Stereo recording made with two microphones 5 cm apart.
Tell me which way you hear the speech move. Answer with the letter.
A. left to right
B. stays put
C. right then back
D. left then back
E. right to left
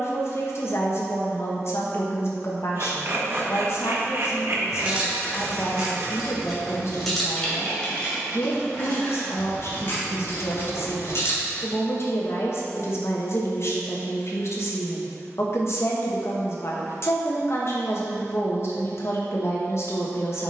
B.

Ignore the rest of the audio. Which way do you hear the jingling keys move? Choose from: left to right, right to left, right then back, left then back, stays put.
right to left.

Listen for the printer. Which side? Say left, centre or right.
right.